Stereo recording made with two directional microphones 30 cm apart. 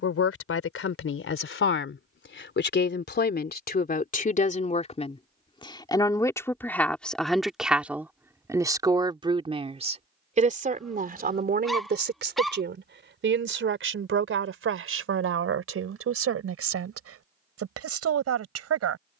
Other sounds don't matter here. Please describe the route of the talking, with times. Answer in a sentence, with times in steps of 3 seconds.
In this clip you hear the talking on the left from 0 s, in the centre from 6 s and on the right from 9 s.